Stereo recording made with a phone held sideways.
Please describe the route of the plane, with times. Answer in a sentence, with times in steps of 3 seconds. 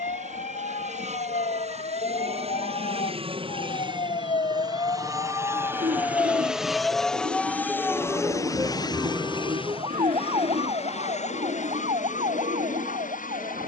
In this clip you hear the plane on the right from 0 s, in the centre from 6 s and on the left from 9 s.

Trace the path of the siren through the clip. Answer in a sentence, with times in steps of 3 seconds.
You can hear the siren on the left from 0 s, in the centre from 6 s and on the right from 9 s.